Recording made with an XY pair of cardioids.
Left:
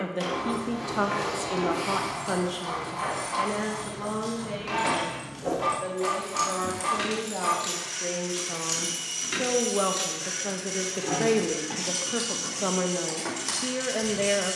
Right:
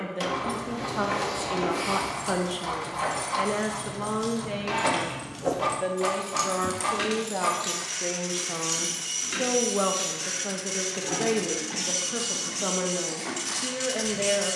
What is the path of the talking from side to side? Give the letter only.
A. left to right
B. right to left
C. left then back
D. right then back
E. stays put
D.